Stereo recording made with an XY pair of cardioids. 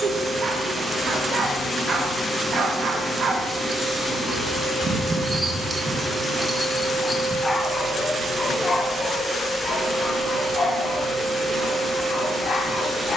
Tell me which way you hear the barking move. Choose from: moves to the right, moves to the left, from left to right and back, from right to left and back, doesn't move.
moves to the left.